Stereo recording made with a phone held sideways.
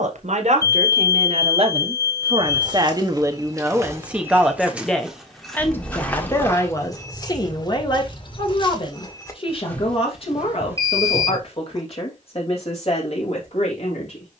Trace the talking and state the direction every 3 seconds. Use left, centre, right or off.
right, centre, left, left, left.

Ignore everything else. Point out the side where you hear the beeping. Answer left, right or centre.
left.